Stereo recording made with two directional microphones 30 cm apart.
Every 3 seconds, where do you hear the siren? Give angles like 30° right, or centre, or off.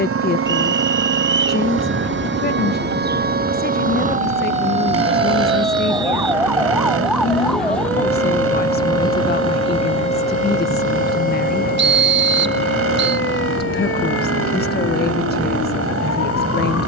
40° right, 20° right, centre, 20° left, 40° left, 50° left.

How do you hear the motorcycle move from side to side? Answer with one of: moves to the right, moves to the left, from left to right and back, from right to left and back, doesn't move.
doesn't move.